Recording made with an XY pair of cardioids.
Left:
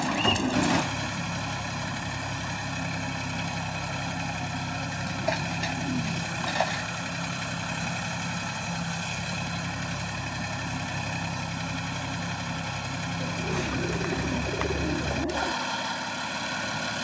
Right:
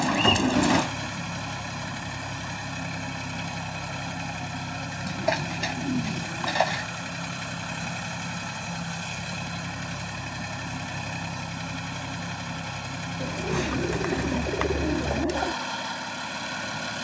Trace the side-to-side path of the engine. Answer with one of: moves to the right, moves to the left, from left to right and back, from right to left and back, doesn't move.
doesn't move.